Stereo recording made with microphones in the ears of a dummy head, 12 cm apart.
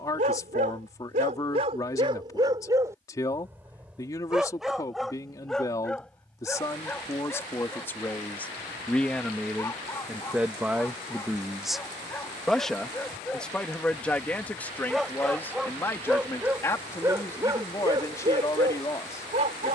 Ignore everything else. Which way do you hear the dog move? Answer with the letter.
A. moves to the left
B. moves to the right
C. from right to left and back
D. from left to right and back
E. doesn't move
C.